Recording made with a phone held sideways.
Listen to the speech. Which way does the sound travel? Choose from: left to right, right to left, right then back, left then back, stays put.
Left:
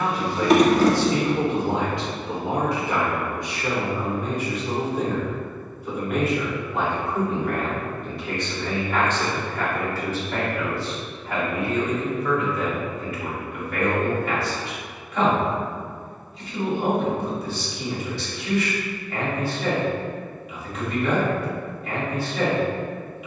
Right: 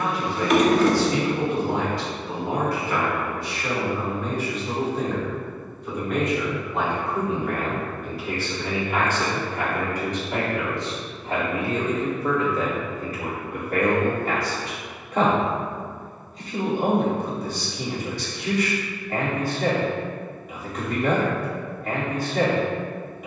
left to right.